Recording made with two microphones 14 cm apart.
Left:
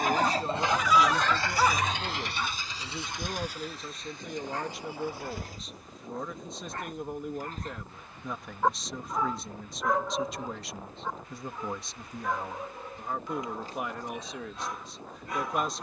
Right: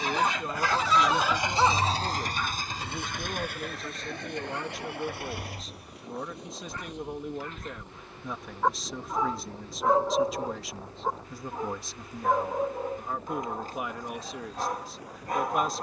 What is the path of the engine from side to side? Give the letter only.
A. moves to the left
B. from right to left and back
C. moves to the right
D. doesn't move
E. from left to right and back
C.